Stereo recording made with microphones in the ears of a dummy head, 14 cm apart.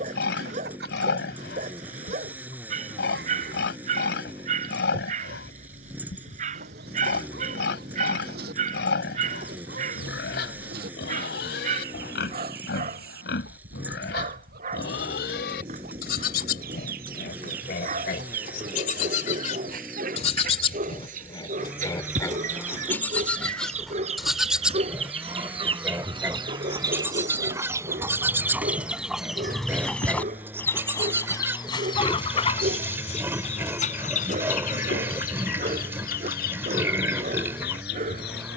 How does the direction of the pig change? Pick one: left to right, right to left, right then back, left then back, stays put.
left to right.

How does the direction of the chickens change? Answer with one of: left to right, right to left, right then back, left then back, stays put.
right to left.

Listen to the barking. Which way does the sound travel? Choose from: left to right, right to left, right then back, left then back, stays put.
stays put.